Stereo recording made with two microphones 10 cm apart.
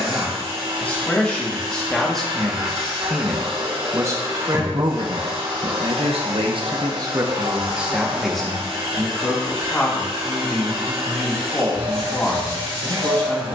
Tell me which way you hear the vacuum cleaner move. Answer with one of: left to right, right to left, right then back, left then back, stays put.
stays put.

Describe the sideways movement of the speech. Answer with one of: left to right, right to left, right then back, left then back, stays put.
right then back.